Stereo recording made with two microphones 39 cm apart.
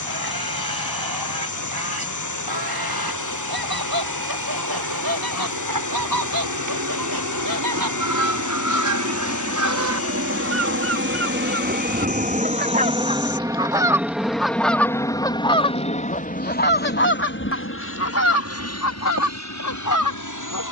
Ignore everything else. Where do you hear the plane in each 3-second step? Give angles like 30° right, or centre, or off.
70° right, 60° right, 50° right, 30° right, 10° right, 20° left, 40° left.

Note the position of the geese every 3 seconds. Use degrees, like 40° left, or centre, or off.
70° right, 60° right, 60° right, 40° right, 10° right, 20° left, 50° left.